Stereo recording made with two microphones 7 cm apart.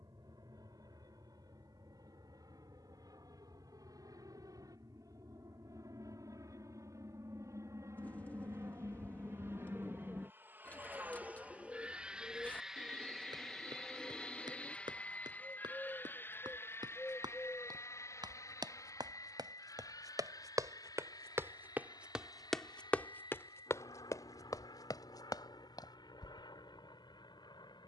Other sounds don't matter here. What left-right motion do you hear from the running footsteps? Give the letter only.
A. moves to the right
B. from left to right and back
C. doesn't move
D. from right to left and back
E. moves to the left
E.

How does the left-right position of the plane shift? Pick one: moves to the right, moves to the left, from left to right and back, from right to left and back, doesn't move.
moves to the left.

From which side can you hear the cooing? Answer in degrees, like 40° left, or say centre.
20° left.